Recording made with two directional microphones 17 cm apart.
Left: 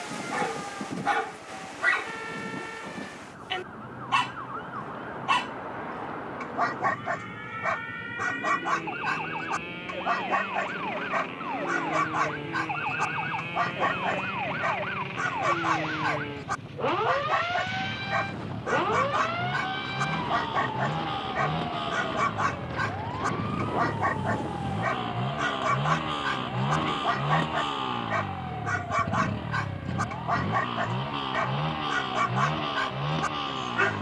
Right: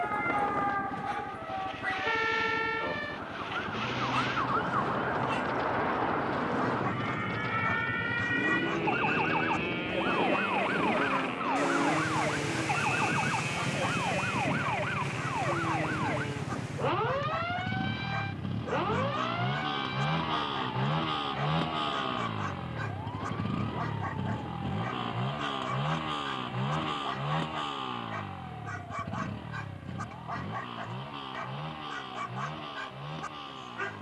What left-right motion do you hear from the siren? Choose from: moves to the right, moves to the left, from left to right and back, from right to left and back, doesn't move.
moves to the left.